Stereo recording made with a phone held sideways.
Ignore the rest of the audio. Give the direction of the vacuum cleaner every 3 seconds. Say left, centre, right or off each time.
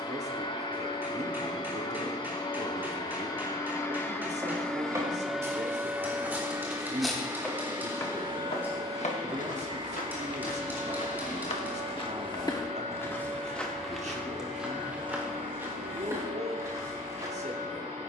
left, centre, right, right, right, right.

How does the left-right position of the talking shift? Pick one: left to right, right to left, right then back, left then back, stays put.
stays put.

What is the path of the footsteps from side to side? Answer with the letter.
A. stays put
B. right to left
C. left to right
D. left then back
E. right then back
D.